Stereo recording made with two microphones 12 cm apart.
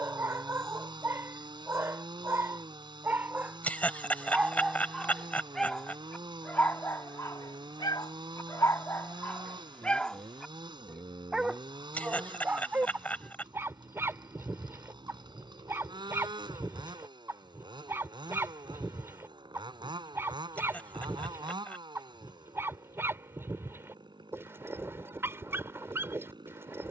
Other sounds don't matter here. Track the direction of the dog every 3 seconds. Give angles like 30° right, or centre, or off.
20° right, 10° right, 20° left, 10° left, 20° right, 20° right, 20° right, 20° right, 20° right.